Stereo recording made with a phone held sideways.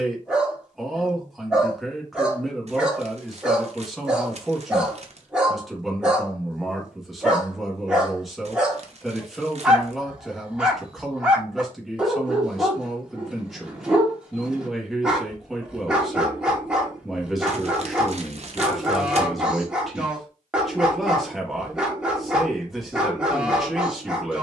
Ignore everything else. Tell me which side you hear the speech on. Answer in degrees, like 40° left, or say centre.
centre.